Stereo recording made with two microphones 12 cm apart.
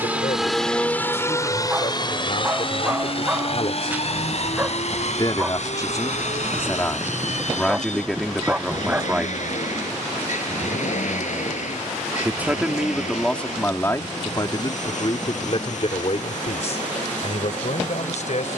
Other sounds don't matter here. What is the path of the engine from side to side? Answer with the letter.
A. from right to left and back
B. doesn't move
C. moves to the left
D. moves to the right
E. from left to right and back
C.